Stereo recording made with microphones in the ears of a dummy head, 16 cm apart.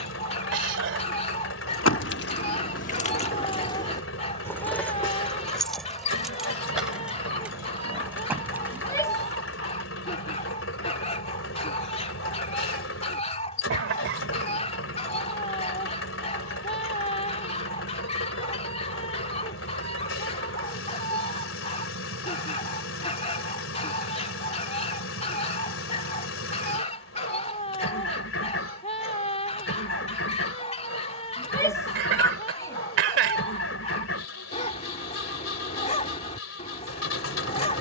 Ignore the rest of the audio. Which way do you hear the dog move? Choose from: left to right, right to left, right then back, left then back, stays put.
stays put.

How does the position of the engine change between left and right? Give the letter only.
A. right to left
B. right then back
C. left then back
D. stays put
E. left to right
D.